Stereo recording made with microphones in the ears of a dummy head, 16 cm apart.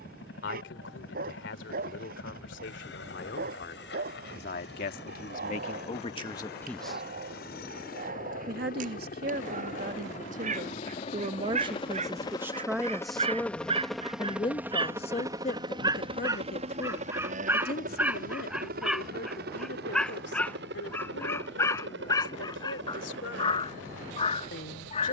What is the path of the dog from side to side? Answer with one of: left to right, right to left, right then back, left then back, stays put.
right to left.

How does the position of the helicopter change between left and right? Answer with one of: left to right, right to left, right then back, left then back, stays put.
left to right.